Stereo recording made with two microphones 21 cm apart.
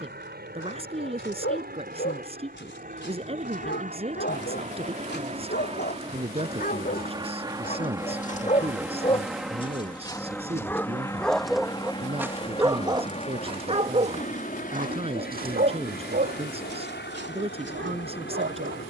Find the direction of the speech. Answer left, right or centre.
right.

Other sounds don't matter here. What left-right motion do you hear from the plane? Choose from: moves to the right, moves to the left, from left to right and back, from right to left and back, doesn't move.
moves to the left.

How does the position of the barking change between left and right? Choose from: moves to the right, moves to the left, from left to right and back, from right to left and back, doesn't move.
moves to the right.